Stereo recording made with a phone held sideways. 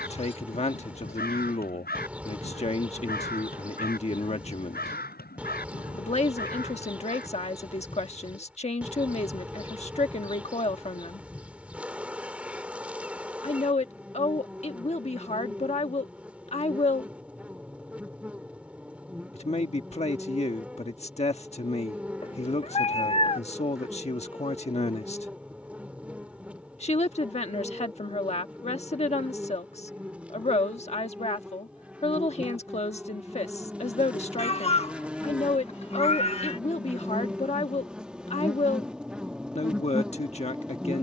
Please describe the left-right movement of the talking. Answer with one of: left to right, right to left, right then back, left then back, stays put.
stays put.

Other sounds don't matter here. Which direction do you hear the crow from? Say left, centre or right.
left.